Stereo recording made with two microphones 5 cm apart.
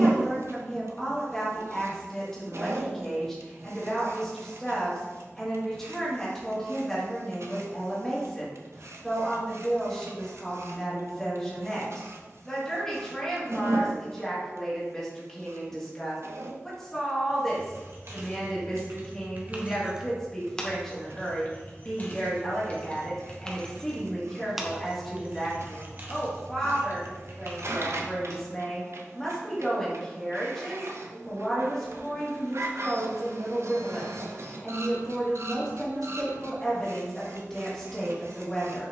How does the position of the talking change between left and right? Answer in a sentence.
You can hear the talking stay in one place.